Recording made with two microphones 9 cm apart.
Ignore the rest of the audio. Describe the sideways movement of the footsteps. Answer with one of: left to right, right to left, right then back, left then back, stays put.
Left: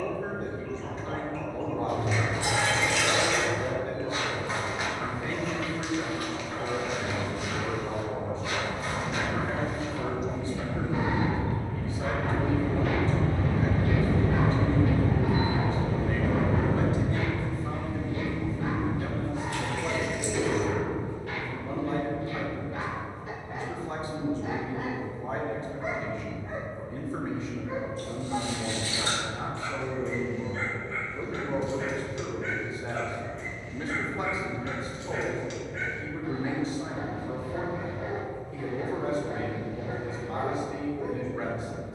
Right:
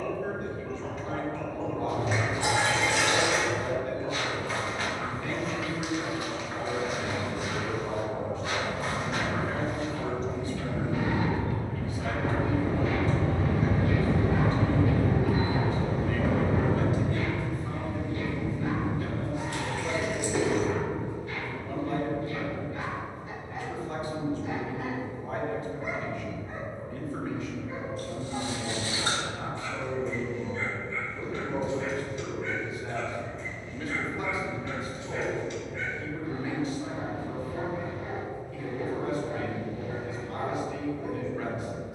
left to right.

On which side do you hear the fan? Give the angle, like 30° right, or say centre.
70° right.